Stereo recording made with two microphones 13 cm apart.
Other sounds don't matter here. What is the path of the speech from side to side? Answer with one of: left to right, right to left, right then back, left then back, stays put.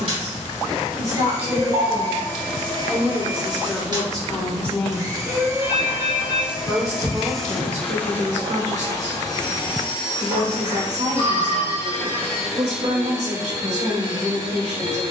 left then back.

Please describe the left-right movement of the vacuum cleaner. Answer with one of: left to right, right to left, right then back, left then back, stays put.
left then back.